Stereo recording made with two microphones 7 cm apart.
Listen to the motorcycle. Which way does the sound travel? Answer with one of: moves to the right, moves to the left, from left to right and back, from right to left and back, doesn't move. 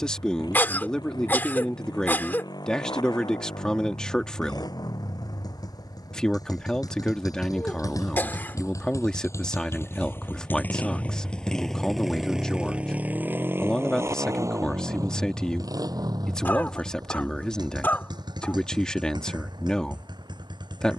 moves to the right.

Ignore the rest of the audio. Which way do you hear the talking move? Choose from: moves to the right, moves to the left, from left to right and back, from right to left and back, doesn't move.
doesn't move.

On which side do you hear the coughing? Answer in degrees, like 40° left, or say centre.
20° left.